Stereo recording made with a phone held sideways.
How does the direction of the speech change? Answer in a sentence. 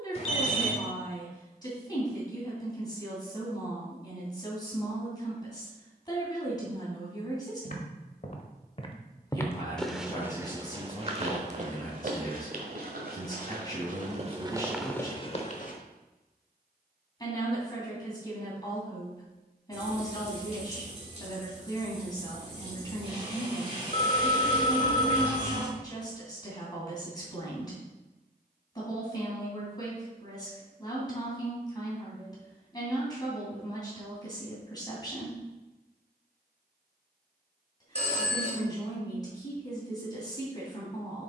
You can hear the speech stay in one place.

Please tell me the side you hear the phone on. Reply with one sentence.
In this clip you hear the phone on the left.